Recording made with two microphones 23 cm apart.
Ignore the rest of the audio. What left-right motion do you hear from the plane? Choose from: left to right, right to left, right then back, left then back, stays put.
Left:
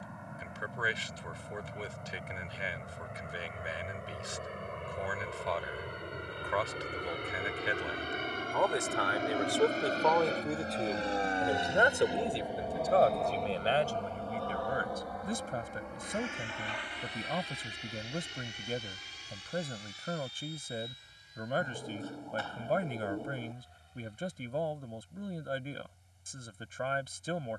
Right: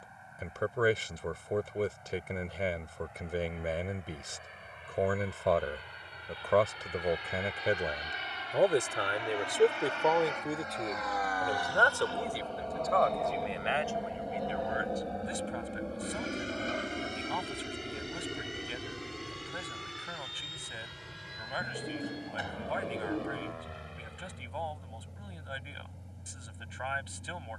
left to right.